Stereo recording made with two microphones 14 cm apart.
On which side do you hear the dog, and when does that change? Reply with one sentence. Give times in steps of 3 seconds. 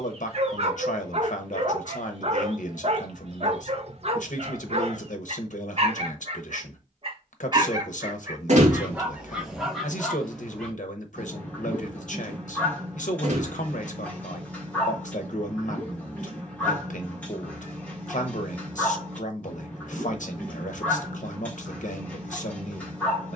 You can hear the dog on the right from 0 s and in the centre from 9 s.